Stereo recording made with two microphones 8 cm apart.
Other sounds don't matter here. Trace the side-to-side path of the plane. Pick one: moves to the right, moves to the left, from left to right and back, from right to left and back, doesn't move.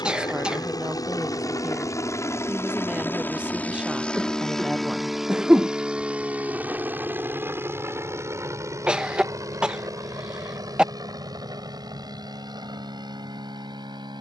moves to the right.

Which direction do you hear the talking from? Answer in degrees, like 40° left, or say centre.
10° right.